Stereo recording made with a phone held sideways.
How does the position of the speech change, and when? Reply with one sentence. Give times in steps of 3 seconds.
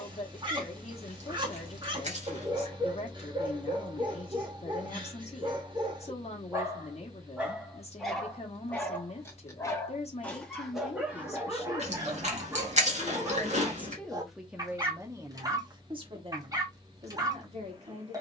You can hear the speech on the left from 0 s, in the centre from 12 s and on the right from 15 s.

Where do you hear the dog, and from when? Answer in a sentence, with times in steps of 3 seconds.
In this clip you hear the dog on the right from 0 s, in the centre from 6 s and on the right from 12 s.